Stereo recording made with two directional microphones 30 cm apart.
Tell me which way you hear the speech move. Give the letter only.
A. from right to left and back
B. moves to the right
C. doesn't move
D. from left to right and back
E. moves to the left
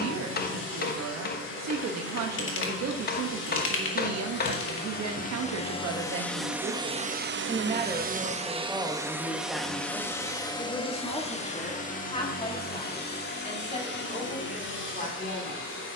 E.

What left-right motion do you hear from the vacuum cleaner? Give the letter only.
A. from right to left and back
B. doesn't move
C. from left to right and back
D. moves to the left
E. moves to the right
C.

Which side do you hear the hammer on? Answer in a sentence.
You can hear the hammer on the left.